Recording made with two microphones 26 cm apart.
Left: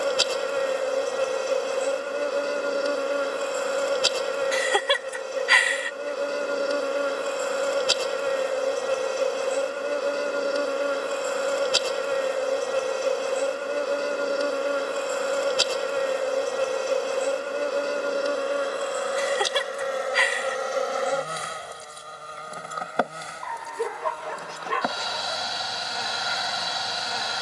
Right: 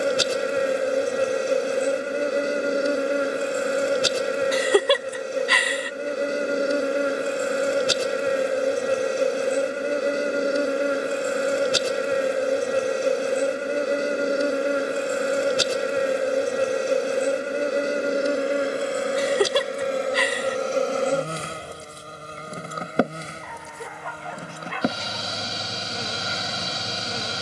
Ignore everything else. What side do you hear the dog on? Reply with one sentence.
You can hear the dog on the left.